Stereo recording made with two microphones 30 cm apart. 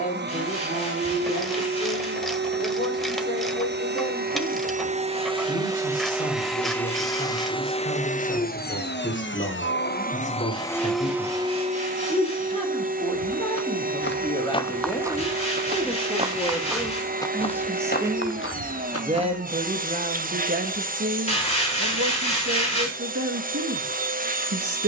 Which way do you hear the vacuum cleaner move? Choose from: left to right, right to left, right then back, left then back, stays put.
left then back.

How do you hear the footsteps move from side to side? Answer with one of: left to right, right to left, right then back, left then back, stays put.
right then back.